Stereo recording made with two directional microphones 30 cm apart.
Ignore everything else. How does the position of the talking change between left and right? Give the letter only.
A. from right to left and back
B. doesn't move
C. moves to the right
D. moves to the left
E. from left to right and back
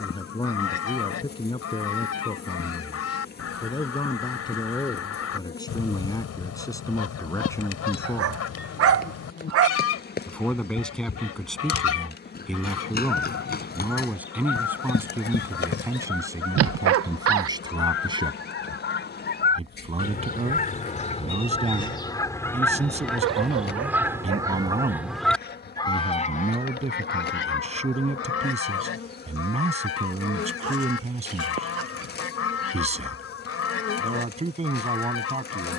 C.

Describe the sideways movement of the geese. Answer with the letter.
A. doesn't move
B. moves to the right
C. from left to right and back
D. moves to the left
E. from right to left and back
C.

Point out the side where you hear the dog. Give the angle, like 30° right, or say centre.
50° right.